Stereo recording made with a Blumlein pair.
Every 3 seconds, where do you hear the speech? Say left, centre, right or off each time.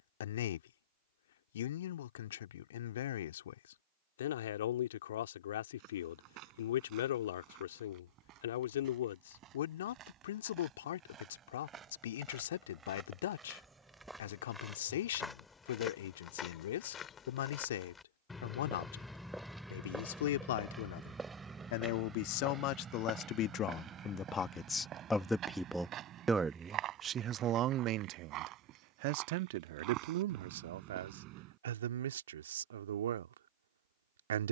left, left, left, left, left, left, left, left, centre, right, right, right.